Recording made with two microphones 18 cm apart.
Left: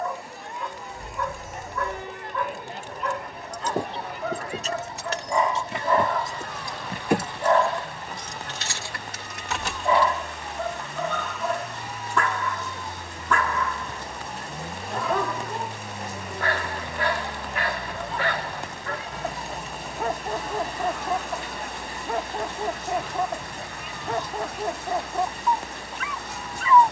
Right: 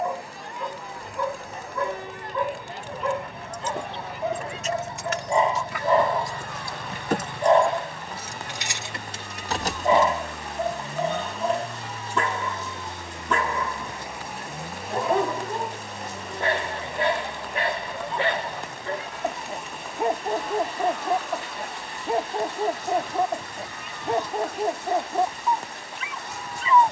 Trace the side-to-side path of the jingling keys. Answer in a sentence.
You can hear the jingling keys move to the right.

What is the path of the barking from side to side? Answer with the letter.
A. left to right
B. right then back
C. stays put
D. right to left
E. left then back
C.